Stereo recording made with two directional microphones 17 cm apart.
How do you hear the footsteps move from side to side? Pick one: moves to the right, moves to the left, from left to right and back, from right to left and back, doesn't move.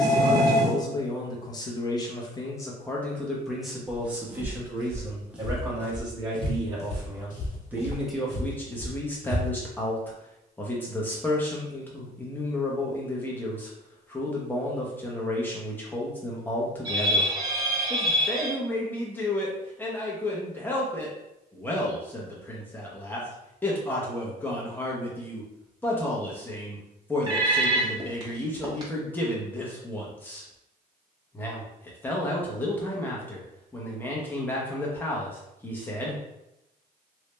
from right to left and back.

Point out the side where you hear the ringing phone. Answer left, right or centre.
right.